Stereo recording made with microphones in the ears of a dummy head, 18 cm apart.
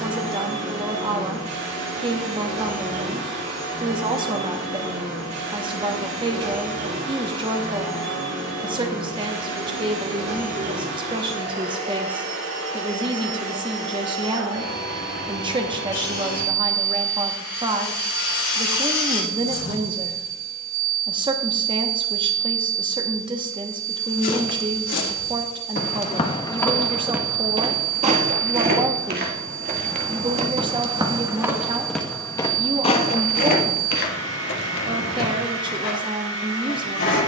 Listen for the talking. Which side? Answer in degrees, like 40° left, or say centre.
20° right.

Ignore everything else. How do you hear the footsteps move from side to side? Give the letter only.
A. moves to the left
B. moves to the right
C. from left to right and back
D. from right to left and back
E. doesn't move
C.